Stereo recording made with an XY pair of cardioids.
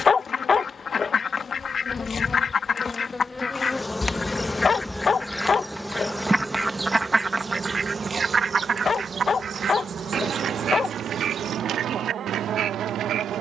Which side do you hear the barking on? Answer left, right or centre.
left.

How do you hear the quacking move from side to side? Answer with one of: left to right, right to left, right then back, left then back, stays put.
left to right.